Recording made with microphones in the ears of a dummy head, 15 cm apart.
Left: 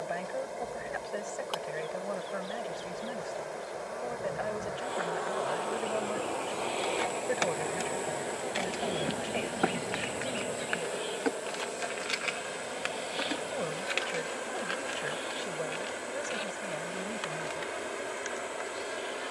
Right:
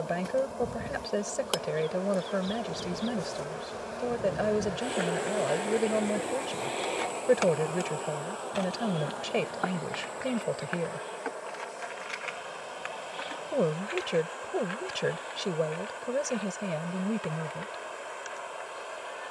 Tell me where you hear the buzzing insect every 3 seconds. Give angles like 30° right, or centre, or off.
60° right, 40° right, 10° left, 30° left, 50° left, 60° left, 60° left.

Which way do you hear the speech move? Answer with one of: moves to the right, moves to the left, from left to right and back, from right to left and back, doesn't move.
doesn't move.